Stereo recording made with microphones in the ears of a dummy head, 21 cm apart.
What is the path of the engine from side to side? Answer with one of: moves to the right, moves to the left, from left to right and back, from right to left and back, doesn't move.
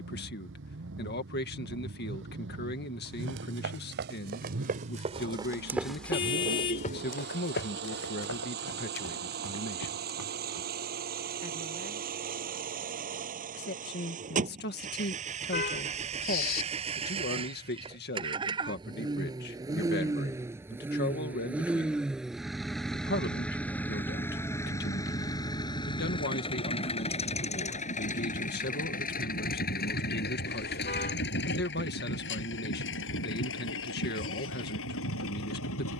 moves to the left.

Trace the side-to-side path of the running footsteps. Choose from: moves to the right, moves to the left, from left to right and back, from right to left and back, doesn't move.
moves to the left.